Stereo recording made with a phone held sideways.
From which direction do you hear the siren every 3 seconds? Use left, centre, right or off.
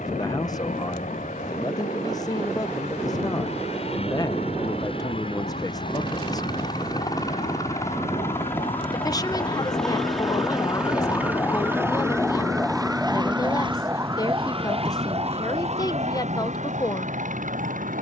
left, left, left, left, centre, right.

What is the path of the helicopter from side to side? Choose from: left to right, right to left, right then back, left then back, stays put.
left to right.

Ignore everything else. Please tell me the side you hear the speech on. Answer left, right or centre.
left.